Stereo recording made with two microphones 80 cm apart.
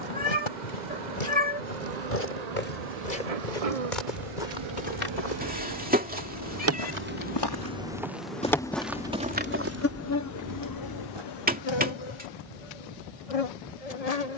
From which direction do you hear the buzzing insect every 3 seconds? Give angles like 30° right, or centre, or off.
60° right, 40° right, 10° right, 20° left, 40° left.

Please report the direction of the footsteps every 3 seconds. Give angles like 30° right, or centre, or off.
80° left, 70° left, 20° left, 20° right, off.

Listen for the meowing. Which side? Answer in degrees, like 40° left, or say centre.
10° right.